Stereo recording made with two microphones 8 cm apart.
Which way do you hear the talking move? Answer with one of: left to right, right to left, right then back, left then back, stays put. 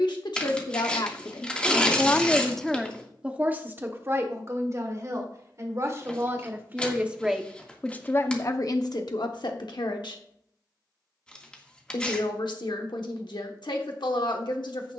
right then back.